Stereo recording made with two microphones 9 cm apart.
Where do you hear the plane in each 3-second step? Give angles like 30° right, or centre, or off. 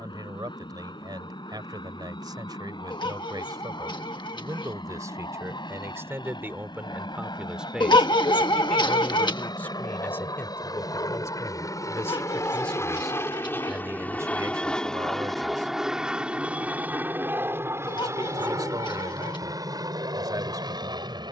80° left, 70° left, 70° left, 50° left, 30° left, 10° right, 40° right.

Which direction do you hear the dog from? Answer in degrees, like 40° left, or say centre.
60° left.